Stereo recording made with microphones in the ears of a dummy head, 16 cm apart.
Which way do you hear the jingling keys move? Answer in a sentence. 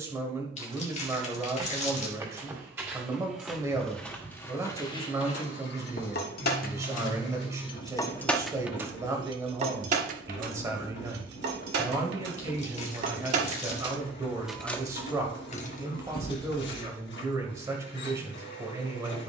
In this clip you hear the jingling keys move from left to right and back again.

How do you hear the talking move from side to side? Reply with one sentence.
In this clip you hear the talking stay put.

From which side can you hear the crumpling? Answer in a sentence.
In this clip you hear the crumpling on the left.